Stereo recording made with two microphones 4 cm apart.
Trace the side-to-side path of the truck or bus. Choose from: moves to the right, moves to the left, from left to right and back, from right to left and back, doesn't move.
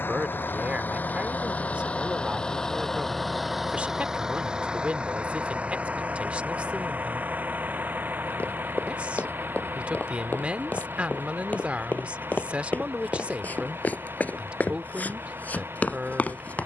moves to the right.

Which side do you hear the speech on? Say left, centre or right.
right.